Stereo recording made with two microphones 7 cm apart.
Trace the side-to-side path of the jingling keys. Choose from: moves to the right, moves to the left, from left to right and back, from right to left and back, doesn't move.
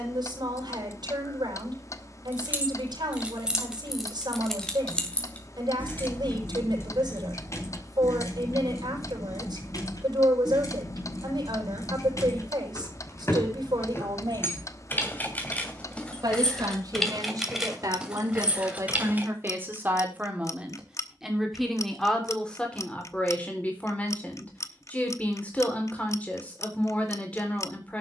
from right to left and back.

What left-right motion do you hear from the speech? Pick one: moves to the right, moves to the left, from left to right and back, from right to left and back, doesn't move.
moves to the left.